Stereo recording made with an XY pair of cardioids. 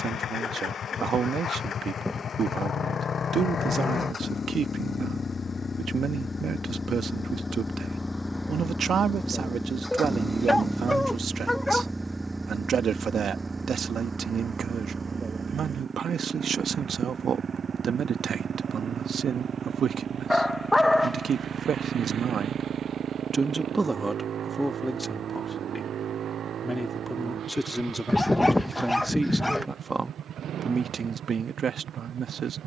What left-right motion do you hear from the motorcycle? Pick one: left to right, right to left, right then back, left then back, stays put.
left to right.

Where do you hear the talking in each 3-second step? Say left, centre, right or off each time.
right, right, right, right, right, right, right, right, centre, centre, right.